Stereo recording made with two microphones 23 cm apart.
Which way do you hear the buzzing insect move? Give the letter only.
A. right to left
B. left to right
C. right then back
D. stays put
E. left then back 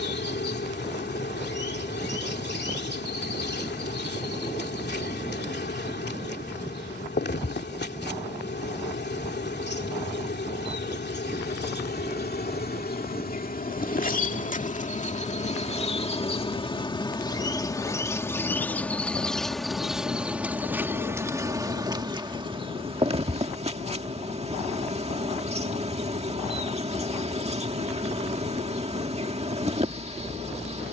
B.